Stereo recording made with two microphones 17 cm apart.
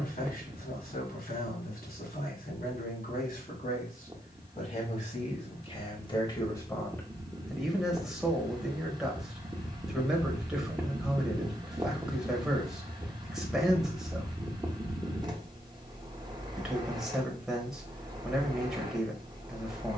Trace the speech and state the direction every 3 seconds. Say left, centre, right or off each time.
left, left, centre, centre, centre, centre, centre.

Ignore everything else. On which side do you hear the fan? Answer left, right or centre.
right.